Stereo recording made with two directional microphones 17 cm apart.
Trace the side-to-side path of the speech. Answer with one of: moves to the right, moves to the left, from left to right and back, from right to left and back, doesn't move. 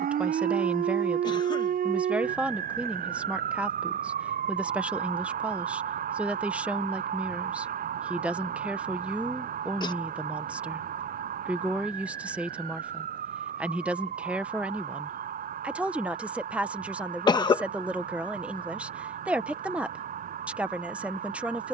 doesn't move.